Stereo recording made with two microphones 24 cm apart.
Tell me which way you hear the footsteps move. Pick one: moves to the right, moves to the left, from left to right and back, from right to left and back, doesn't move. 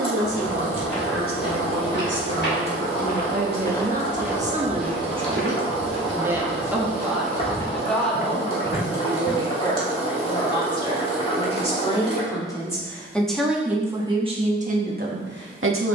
from left to right and back.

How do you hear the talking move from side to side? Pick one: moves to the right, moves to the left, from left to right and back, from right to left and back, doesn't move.
from right to left and back.